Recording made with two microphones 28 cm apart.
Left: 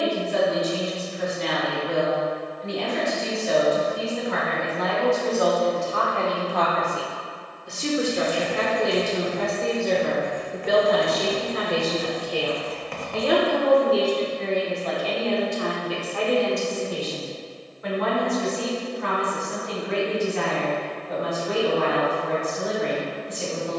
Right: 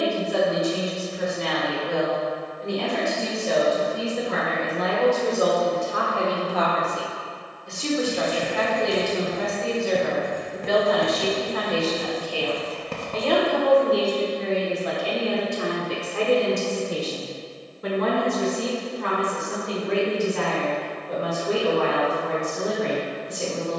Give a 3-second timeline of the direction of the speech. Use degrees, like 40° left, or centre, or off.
50° right, 40° right, 10° left, 40° left, 10° left, 30° right, 50° right, 50° right.